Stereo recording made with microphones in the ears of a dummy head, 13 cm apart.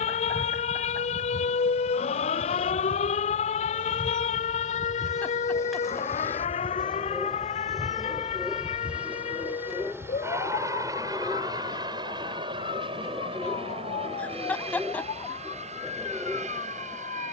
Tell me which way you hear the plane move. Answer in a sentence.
In this clip you hear the plane go from the left side to the right.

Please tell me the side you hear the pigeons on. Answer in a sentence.
You can hear the pigeons in the centre.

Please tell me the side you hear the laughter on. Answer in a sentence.
In this clip you hear the laughter in the centre.